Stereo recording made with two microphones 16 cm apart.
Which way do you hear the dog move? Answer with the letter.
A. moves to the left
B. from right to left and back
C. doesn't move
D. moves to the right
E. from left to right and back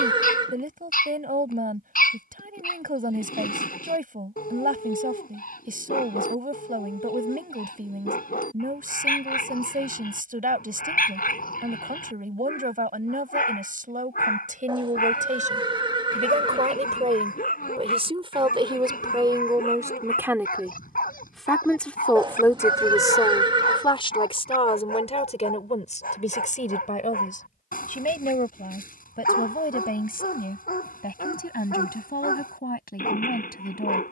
C.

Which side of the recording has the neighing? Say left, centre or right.
right.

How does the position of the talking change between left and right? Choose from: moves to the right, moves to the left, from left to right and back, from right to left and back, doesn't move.
moves to the left.